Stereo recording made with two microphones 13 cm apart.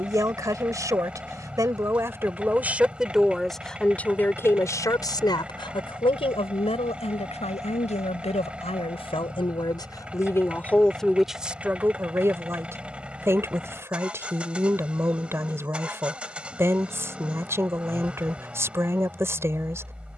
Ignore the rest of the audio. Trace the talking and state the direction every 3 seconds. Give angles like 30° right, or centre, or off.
20° right, 20° left, 60° left, 20° left, 20° right, 20° right, 20° right.